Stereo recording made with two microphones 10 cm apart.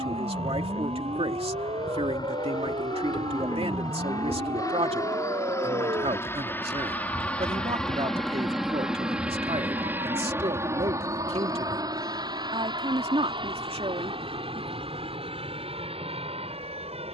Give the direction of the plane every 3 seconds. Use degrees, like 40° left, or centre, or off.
50° left, 40° left, 10° left, 20° right, 50° right, 60° right.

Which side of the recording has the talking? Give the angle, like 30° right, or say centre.
70° right.